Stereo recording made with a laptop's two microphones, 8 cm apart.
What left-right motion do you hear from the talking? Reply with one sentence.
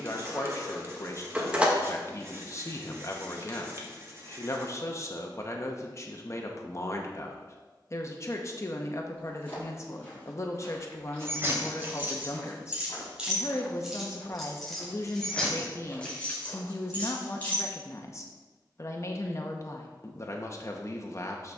In this clip you hear the talking stay in one place.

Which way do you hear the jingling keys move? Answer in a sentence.
You can hear the jingling keys move to the left.